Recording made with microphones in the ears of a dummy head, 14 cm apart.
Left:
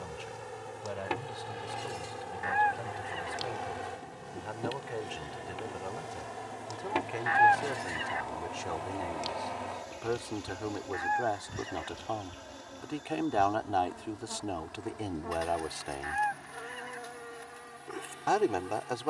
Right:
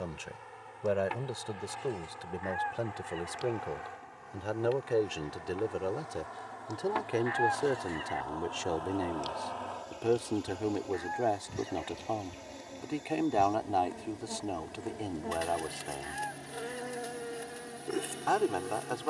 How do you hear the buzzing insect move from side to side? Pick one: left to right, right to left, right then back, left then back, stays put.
left to right.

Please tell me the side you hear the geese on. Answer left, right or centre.
left.